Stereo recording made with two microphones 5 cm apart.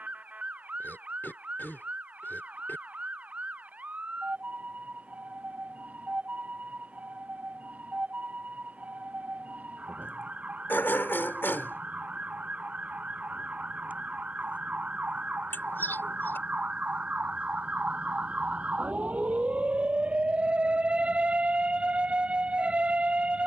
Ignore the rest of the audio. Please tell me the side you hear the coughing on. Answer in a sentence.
In this clip you hear the coughing on the left.